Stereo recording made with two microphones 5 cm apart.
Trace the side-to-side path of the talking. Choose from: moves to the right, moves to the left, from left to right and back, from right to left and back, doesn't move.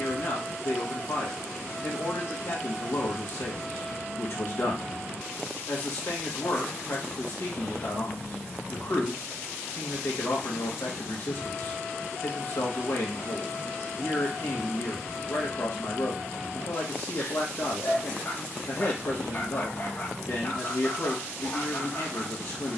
doesn't move.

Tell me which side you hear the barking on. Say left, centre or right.
left.